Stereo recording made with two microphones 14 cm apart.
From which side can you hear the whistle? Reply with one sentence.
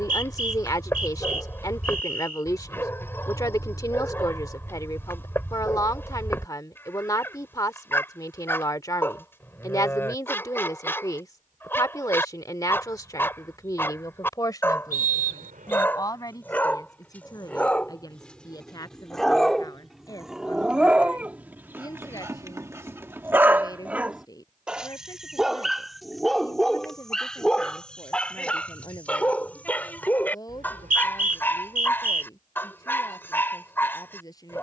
In this clip you hear the whistle on the right.